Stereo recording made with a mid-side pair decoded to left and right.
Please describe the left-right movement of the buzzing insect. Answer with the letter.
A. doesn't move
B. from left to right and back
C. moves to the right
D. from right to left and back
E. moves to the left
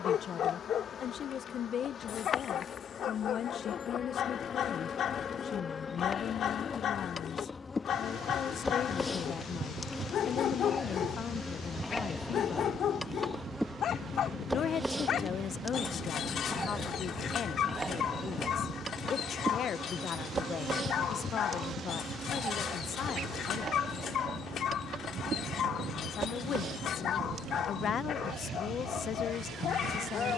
C.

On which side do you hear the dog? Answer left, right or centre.
left.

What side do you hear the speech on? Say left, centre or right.
left.